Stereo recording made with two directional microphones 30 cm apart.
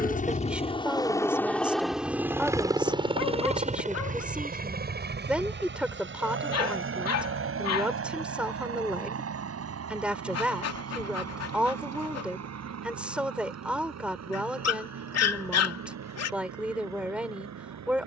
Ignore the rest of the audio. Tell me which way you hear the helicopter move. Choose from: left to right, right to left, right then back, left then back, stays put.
left to right.